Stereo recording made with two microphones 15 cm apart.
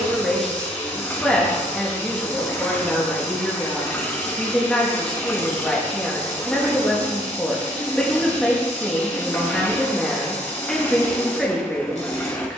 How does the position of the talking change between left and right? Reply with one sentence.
You can hear the talking stay in one place.